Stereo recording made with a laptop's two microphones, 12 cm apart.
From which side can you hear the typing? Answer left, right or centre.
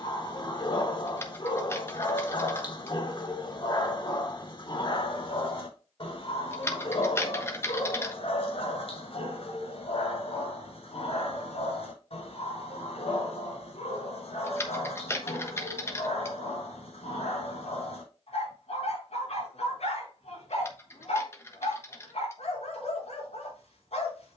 left.